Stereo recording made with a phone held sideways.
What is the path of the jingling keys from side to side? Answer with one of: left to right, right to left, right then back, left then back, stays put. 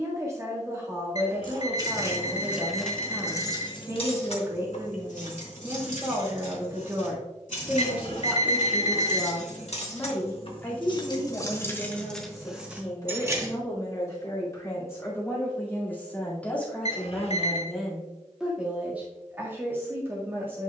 left then back.